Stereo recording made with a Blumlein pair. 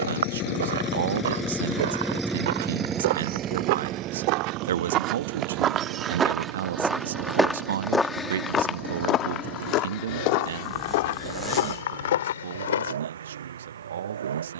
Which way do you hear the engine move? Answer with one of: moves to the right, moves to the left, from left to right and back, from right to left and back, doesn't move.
moves to the right.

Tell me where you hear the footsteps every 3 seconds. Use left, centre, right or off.
right, right, centre, left, left.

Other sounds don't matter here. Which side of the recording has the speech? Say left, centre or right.
right.